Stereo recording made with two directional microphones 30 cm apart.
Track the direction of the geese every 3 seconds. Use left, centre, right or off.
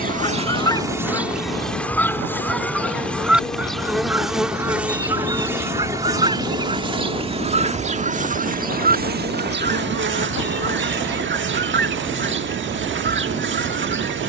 centre, centre, right, right, right.